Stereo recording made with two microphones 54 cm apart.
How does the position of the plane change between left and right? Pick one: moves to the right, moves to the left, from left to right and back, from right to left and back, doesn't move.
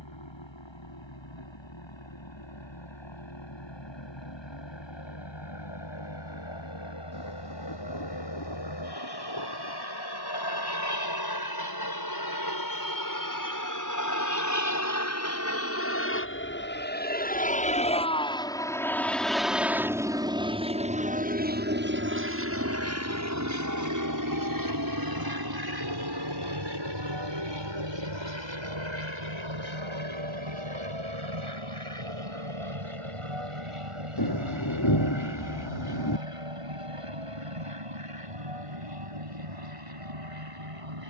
moves to the right.